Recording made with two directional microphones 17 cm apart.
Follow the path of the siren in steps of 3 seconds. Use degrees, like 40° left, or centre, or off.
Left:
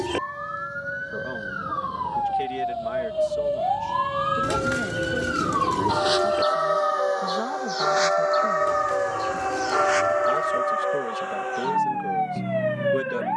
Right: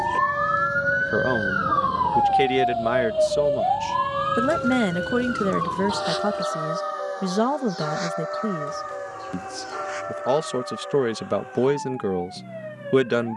40° right, centre, 40° left, 50° left, 60° left.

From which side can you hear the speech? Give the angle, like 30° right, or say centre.
70° right.